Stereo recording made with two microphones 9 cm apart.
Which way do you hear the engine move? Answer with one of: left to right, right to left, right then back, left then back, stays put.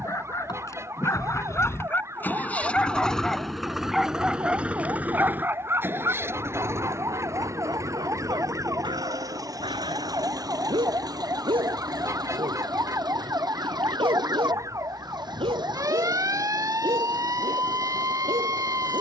left to right.